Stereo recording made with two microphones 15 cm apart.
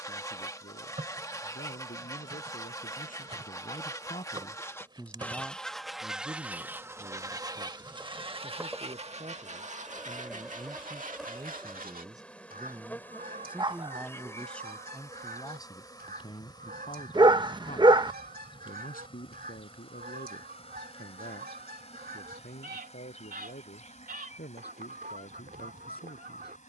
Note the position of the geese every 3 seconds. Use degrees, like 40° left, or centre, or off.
20° left, 10° left, 20° right, 50° right, 70° right, 70° right, 70° right, 70° right, 70° right.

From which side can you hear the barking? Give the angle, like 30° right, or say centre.
30° right.